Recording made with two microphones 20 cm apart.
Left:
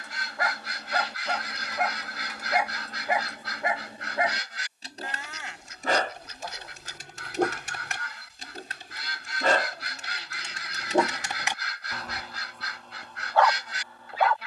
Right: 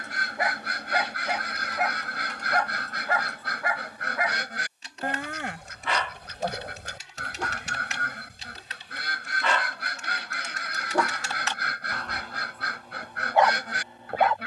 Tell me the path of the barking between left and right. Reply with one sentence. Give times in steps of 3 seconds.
In this clip you hear the barking in the centre from 0 s, on the left from 3 s and in the centre from 12 s.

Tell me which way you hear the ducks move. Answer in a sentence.
You can hear the ducks stay put.